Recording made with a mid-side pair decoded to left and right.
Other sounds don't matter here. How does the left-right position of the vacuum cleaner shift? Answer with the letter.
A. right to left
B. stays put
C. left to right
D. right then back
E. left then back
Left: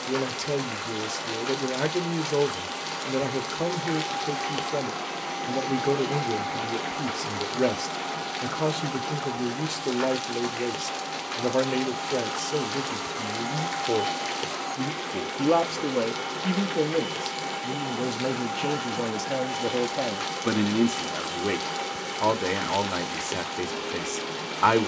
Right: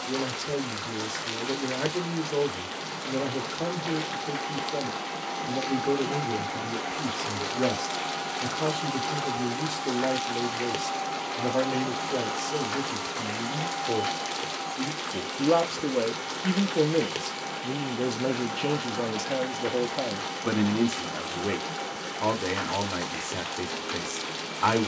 D.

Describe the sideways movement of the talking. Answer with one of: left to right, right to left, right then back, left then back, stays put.
right then back.